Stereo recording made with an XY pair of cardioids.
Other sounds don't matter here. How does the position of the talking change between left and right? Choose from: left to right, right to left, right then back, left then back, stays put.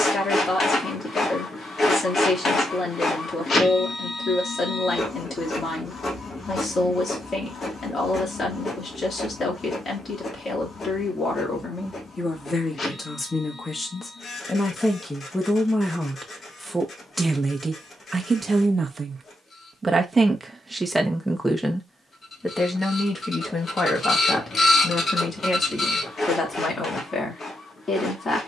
right then back.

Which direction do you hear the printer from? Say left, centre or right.
left.